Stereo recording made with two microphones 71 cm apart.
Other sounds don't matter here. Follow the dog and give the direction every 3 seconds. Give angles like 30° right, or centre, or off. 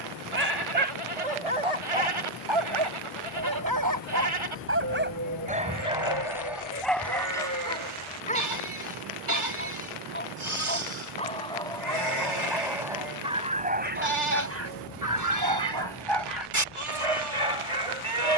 50° right, 20° right, centre, 10° left, 10° right, 40° right.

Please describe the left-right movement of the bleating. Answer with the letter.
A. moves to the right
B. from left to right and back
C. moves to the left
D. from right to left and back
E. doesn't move
E.